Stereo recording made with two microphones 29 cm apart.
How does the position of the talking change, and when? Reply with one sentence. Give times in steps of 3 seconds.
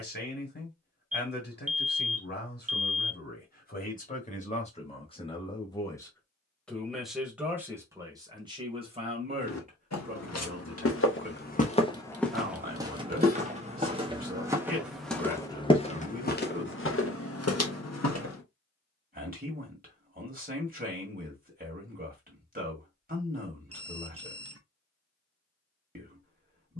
You can hear the talking on the left from 0 s, in the centre from 6 s and on the right from 9 s.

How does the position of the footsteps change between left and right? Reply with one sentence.
You can hear the footsteps go right and come back.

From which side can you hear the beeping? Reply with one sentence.
You can hear the beeping on the right.